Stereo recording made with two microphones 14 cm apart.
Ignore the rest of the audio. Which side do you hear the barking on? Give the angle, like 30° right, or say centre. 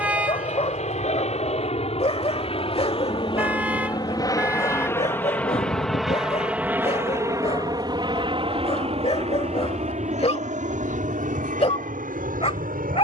40° left.